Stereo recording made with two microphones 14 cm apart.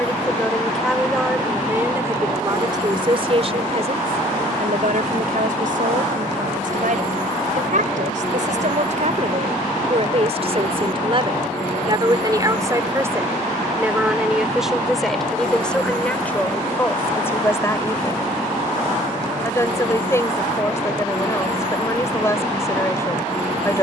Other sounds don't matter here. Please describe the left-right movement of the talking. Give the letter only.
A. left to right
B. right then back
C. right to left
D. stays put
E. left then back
B.